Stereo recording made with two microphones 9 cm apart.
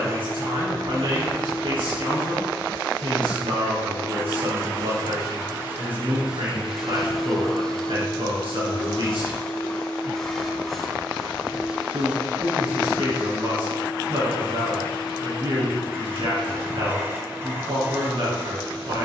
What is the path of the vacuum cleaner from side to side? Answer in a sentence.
In this clip you hear the vacuum cleaner move from right to left and back again.